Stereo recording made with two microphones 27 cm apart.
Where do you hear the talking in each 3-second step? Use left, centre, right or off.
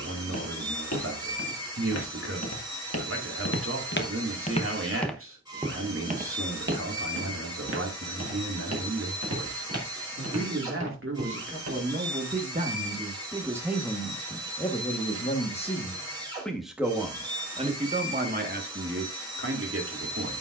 right, right, right, right, centre, centre, right.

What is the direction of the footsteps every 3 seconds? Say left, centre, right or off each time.
left, left, right, right, off, off, off.